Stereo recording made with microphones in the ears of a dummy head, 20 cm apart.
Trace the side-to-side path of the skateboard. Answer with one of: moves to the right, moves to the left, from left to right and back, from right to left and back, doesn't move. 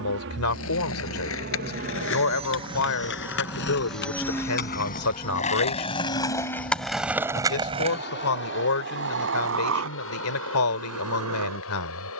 moves to the right.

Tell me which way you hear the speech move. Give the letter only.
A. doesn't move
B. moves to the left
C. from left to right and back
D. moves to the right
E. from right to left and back
A.